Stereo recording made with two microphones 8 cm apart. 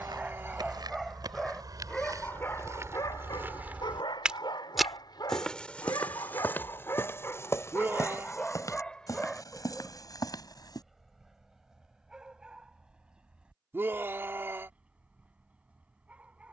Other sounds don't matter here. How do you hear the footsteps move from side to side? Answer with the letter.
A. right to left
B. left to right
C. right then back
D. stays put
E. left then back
A.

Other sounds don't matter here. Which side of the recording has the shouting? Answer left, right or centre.
right.